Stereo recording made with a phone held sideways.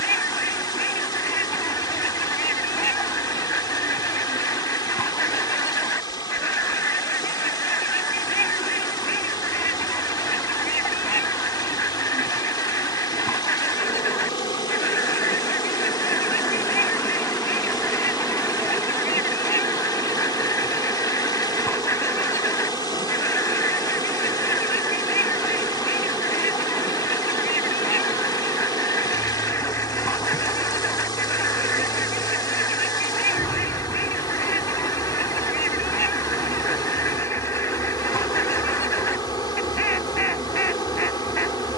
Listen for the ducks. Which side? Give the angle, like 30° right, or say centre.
20° left.